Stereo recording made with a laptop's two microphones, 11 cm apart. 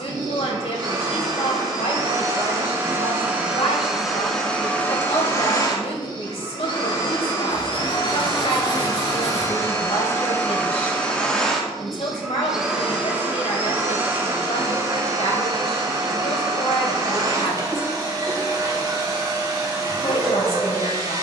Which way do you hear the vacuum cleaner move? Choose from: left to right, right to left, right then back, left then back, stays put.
left then back.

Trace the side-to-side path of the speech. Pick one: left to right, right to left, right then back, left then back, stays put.
stays put.